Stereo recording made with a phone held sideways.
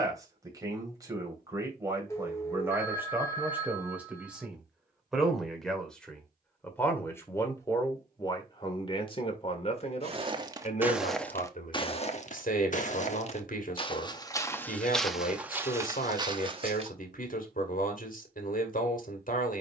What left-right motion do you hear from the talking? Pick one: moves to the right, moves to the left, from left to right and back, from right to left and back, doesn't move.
moves to the left.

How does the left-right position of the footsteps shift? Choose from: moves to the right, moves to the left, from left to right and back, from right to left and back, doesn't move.
from right to left and back.